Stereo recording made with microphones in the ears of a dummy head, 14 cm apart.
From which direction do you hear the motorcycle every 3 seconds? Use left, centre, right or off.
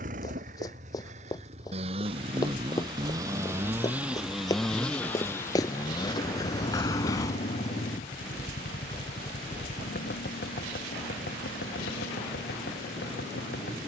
right, centre, left, left, left.